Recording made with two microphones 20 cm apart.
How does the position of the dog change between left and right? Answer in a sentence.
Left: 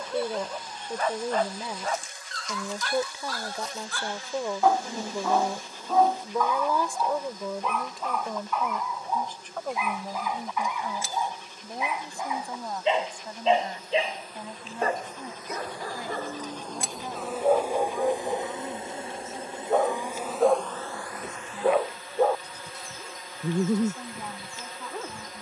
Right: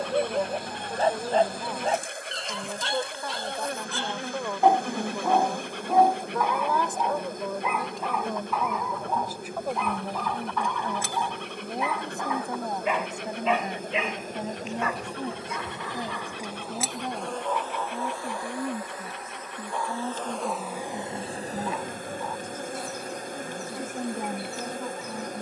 You can hear the dog go from the right side to the left.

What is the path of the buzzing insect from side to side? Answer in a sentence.
You can hear the buzzing insect move from right to left and back again.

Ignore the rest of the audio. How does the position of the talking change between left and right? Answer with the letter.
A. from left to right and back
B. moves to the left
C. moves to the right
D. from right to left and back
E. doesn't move
C.